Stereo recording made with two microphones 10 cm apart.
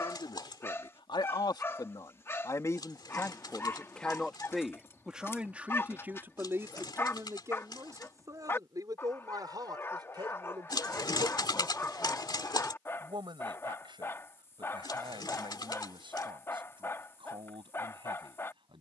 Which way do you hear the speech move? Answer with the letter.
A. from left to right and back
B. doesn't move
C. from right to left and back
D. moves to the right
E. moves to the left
D.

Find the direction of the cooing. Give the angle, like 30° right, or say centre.
50° left.